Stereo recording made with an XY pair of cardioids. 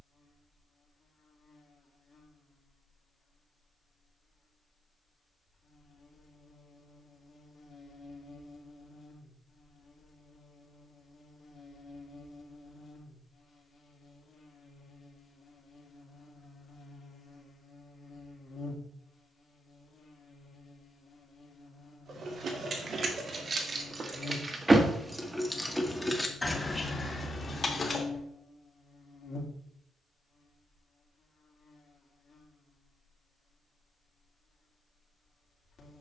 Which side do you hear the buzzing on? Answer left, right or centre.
left.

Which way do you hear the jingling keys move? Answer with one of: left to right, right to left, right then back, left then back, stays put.
right to left.